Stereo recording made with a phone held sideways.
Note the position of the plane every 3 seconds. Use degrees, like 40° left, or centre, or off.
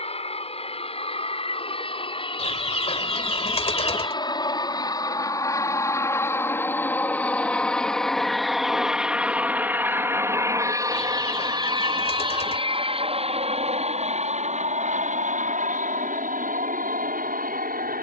40° left, 30° left, 10° left, 20° right, 40° right, 60° right.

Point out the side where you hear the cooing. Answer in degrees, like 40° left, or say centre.
40° left.